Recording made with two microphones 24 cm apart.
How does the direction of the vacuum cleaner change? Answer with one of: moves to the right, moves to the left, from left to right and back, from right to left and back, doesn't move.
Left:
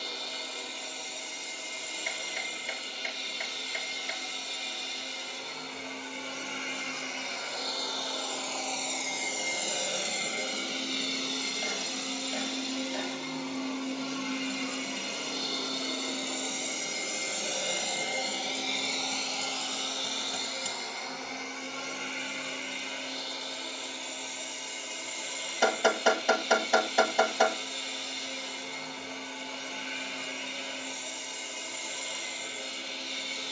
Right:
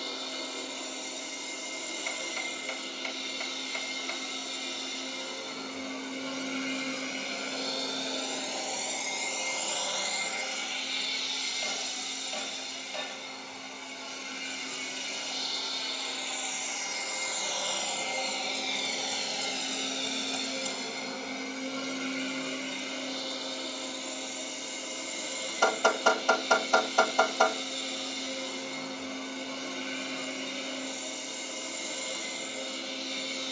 from right to left and back.